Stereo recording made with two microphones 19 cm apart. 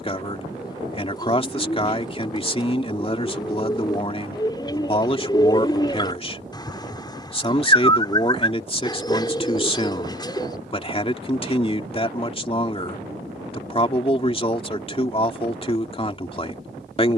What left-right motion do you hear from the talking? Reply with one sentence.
You can hear the talking stay put.